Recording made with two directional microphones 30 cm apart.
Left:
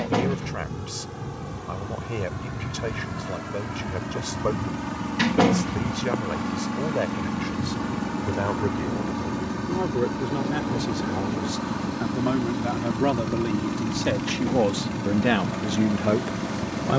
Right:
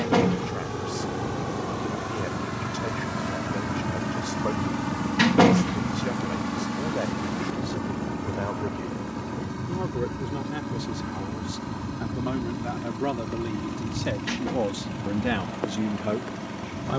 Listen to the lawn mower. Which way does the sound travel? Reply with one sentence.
In this clip you hear the lawn mower travel towards the left.